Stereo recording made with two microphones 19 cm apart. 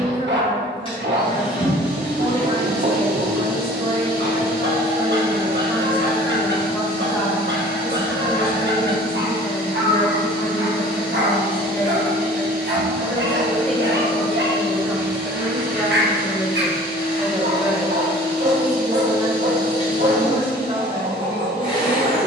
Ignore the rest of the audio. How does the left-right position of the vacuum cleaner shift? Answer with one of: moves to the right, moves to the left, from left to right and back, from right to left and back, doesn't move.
doesn't move.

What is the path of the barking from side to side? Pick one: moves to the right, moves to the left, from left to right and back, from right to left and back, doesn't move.
doesn't move.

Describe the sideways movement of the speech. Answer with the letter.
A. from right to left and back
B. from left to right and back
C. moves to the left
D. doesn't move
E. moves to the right
A.